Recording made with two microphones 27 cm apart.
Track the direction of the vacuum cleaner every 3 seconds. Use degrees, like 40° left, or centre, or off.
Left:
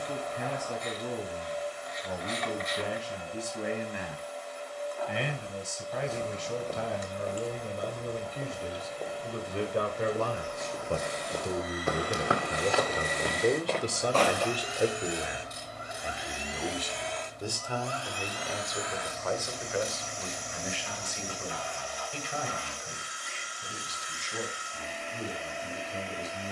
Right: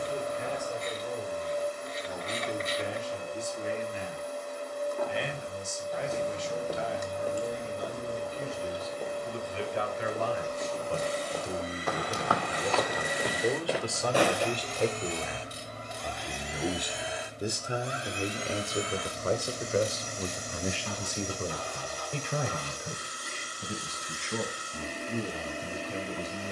50° right, 50° right, 50° right, 40° right, 10° right, centre, 40° right, 40° right, 40° right.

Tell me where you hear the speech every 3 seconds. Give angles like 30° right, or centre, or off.
70° left, 70° left, 60° left, 50° left, 20° left, 10° right, 40° right, 50° right, 60° right.